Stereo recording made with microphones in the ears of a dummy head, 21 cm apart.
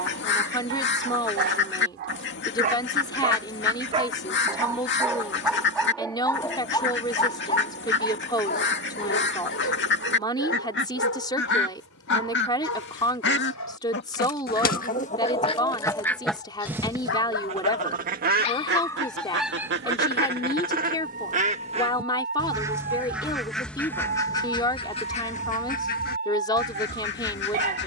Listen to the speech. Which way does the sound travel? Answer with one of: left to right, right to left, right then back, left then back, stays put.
stays put.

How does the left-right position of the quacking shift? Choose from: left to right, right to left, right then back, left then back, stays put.
right then back.